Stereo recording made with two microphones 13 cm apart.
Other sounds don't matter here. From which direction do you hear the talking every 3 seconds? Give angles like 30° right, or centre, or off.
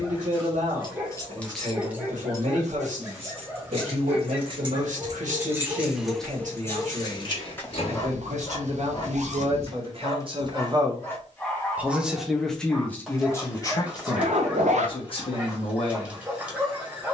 70° right, 70° right, 60° right, 40° right, 20° left, 50° left.